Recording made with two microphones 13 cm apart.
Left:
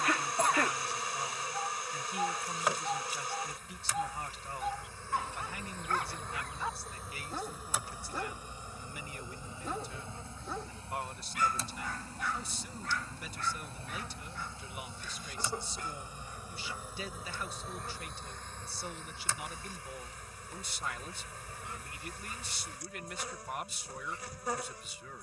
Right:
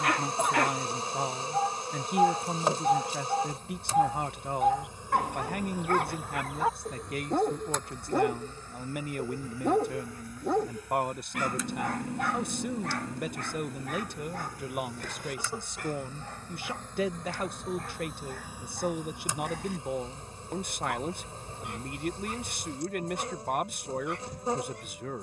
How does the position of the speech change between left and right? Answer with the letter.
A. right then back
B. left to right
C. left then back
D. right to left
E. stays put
E.